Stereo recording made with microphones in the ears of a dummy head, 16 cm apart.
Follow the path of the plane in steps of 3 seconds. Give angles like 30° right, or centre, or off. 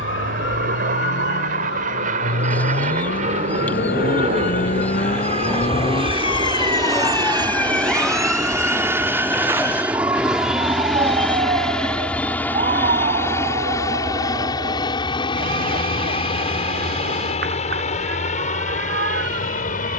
50° right, 40° right, 20° right, centre, 20° left, 30° left, 40° left.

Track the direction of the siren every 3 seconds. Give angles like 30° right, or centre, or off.
70° left, 50° left, 10° left, 20° right, 40° right, 50° right, 60° right.